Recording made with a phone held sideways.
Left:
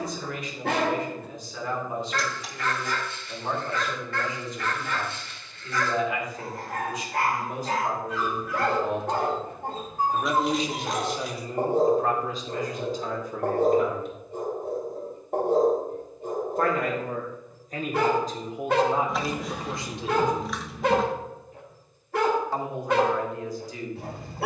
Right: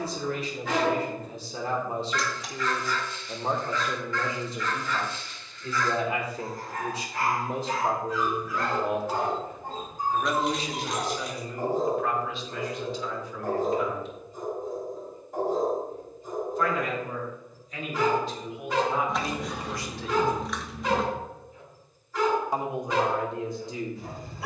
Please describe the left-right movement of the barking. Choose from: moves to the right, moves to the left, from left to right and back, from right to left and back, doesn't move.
doesn't move.